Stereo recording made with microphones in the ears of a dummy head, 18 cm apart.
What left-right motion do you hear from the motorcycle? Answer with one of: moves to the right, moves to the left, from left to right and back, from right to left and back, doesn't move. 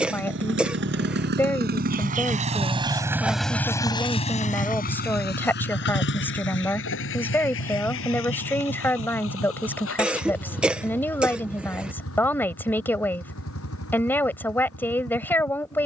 moves to the left.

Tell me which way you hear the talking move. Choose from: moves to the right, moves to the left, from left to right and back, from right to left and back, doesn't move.
doesn't move.